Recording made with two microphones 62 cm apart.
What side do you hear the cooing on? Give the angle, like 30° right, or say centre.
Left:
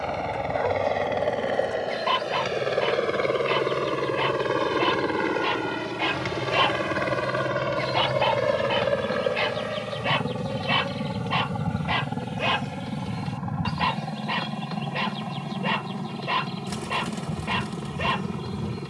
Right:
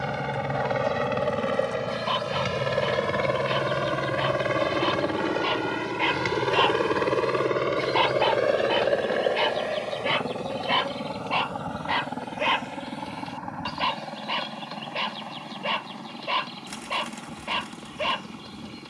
80° left.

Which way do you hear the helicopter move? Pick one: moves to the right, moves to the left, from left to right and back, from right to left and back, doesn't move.
moves to the left.